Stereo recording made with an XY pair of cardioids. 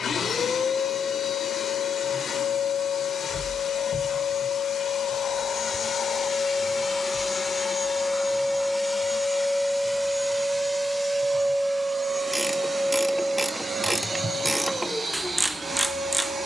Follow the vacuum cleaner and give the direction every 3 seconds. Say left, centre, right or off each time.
left, left, left, centre, right, right.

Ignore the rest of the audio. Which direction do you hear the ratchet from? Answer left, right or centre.
centre.